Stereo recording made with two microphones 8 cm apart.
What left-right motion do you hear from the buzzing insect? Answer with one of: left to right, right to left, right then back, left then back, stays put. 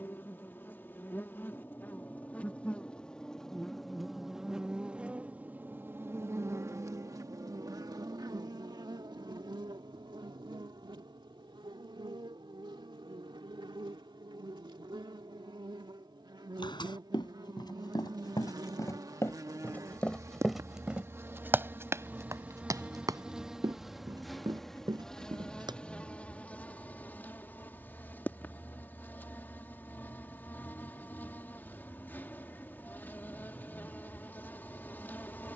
right then back.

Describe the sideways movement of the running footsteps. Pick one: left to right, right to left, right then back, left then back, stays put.
left to right.